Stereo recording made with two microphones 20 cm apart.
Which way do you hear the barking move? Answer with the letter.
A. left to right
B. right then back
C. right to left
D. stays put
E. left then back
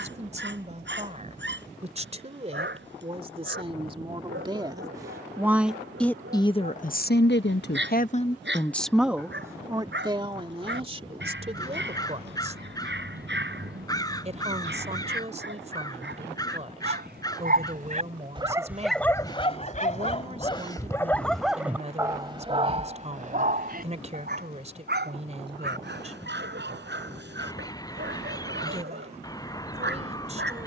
E.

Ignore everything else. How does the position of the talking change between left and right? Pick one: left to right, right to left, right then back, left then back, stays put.
left then back.